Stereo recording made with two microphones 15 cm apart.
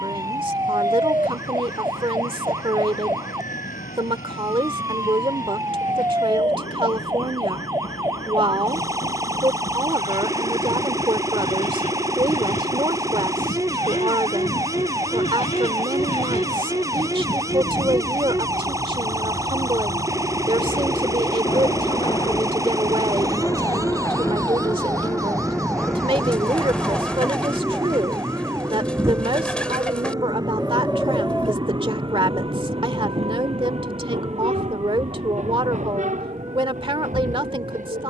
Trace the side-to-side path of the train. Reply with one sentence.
In this clip you hear the train move from left to right.